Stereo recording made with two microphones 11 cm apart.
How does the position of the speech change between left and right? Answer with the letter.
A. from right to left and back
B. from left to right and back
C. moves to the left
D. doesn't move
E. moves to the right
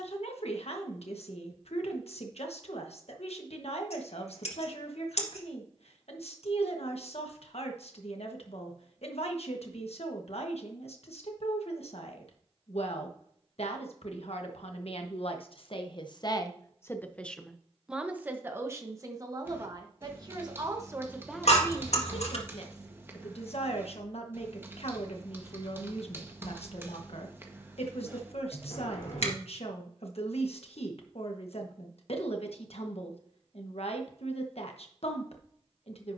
B.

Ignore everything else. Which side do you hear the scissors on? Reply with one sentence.
You can hear the scissors on the left.